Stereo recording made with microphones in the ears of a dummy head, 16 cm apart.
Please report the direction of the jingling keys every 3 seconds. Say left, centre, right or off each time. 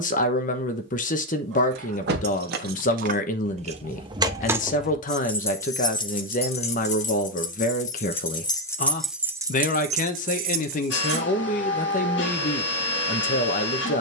right, centre, left, right, off.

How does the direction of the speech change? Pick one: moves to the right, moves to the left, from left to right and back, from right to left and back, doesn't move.
doesn't move.